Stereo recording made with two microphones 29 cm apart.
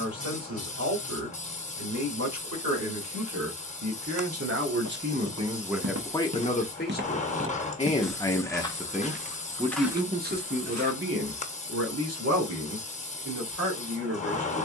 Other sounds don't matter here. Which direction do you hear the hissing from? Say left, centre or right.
left.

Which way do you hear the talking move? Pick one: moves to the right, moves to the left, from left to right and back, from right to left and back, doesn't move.
from right to left and back.